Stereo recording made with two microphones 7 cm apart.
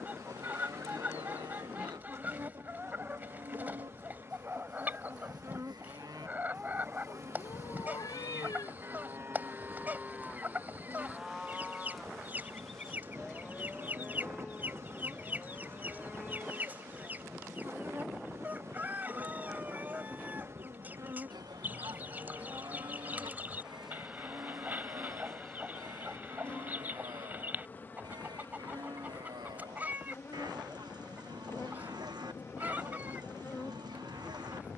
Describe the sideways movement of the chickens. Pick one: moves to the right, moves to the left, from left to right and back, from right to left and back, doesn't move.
doesn't move.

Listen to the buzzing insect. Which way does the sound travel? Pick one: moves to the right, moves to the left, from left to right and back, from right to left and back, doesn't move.
moves to the left.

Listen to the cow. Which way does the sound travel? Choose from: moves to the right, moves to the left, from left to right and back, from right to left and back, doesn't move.
from right to left and back.